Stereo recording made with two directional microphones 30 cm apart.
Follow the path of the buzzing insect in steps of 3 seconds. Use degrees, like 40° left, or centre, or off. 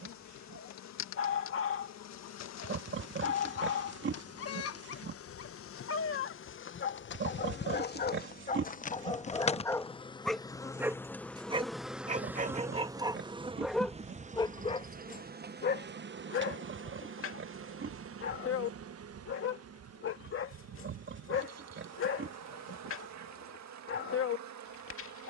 60° left, 50° left, 40° left, 10° left, 20° right, 40° right, 50° right, 60° right, 60° right.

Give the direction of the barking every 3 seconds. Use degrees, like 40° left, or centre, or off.
40° left, 40° left, 40° left, centre, 10° right, 40° left, 40° left, 40° left, 40° left.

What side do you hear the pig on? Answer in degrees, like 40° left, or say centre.
40° right.